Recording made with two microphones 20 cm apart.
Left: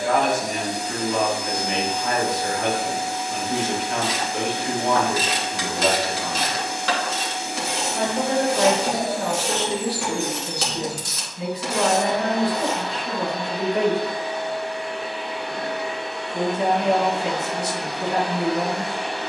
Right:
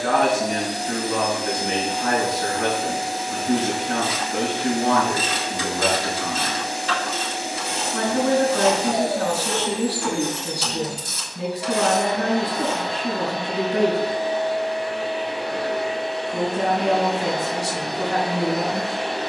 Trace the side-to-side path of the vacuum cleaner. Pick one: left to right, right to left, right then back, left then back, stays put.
stays put.